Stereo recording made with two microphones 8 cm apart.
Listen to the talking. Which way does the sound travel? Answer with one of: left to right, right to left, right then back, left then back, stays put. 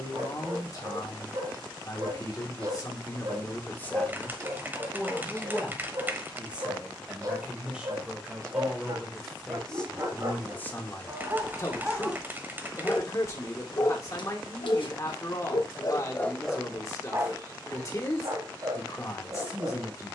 right then back.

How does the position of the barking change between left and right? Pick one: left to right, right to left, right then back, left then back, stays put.
left then back.